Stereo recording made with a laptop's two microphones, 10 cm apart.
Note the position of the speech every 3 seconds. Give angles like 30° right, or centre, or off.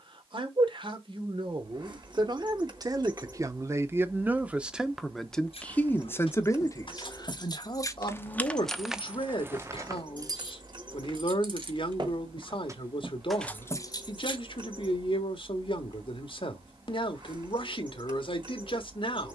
50° right, 10° right, 40° left, 60° left, 60° left, 60° left, 60° left.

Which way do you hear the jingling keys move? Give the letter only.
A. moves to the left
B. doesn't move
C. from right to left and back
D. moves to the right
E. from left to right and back
E.